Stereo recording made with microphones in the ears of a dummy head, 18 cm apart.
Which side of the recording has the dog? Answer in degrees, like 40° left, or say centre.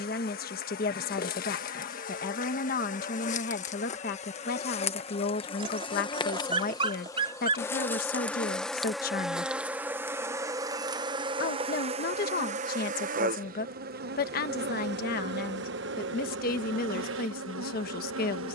30° right.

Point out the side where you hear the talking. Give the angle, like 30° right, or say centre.
50° left.